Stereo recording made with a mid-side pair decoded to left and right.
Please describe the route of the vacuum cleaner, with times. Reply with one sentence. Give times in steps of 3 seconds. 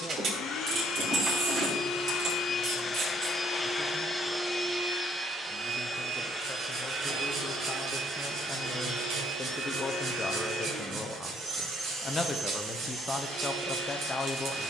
In this clip you hear the vacuum cleaner on the left from 0 s, in the centre from 3 s and on the right from 6 s.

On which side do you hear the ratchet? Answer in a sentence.
You can hear the ratchet on the right.